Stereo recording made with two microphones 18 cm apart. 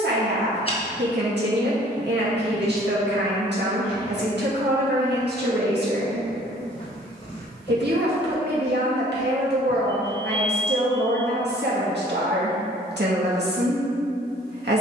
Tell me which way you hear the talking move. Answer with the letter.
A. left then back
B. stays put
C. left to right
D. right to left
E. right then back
B.